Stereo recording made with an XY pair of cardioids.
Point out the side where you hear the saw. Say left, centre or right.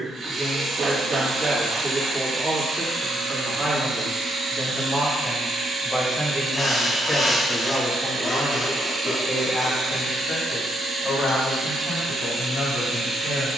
left.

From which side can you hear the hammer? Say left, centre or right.
right.